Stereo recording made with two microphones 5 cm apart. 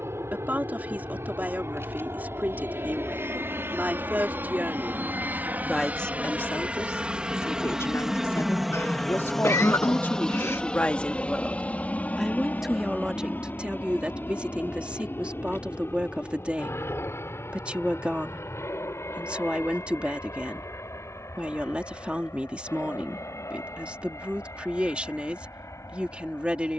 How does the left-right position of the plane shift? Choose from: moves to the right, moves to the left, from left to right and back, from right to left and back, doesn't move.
moves to the left.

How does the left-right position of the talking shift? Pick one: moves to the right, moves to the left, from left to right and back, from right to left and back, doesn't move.
from right to left and back.